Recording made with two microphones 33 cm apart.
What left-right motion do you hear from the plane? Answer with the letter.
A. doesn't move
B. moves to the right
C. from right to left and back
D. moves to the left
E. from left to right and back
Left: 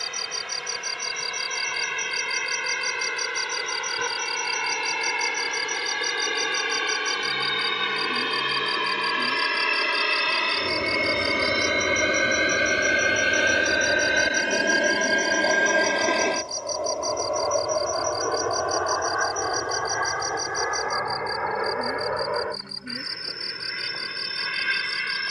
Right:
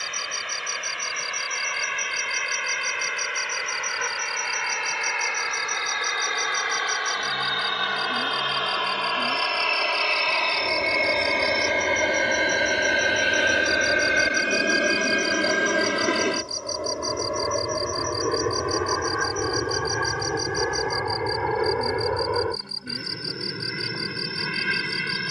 B.